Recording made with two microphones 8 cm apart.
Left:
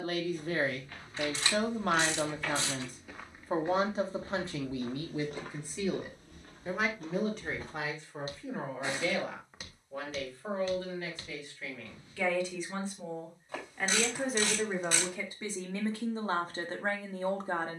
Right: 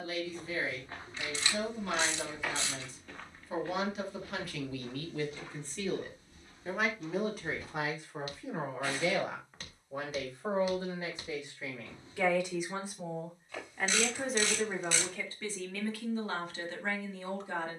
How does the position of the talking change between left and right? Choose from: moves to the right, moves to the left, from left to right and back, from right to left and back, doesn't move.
from left to right and back.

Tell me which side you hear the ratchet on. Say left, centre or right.
left.